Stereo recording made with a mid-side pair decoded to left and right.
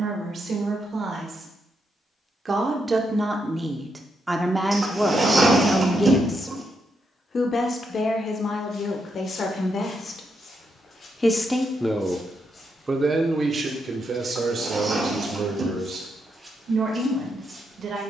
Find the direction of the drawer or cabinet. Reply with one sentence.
In this clip you hear the drawer or cabinet on the right.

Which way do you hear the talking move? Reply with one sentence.
You can hear the talking move from right to left and back again.